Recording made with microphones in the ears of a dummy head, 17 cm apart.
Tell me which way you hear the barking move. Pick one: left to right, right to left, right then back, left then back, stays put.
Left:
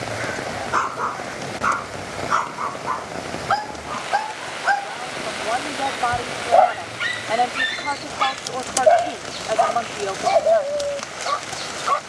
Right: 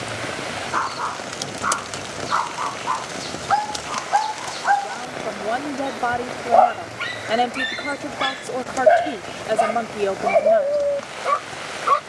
left to right.